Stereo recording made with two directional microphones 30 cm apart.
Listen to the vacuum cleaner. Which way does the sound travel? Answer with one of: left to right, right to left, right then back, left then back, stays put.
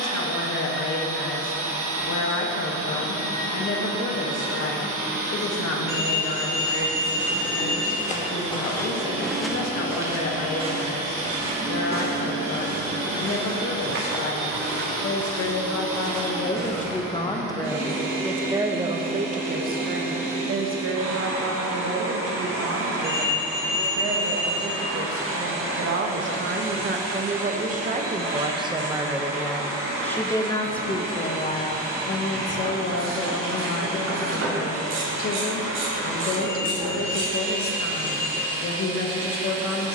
stays put.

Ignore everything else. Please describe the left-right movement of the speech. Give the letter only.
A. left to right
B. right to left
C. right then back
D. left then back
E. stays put
C.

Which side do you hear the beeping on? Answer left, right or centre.
right.